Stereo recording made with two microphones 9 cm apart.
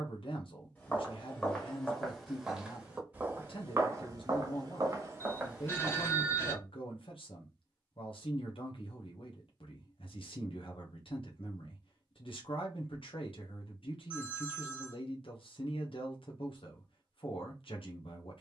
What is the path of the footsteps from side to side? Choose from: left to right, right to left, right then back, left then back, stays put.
right then back.